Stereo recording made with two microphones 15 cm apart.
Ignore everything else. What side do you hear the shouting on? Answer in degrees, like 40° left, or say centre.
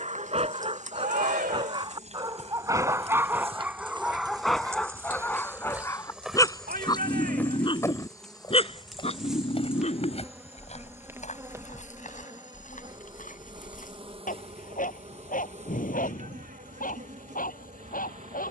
80° right.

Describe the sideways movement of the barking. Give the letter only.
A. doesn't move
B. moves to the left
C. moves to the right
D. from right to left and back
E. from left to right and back
B.